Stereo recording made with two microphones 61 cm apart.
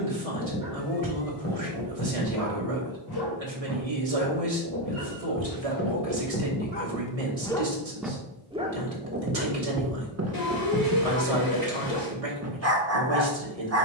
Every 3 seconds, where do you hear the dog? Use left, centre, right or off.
left, left, centre, right, right.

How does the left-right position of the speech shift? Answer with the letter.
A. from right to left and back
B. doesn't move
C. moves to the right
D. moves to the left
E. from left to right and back
B.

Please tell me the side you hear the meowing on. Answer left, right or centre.
left.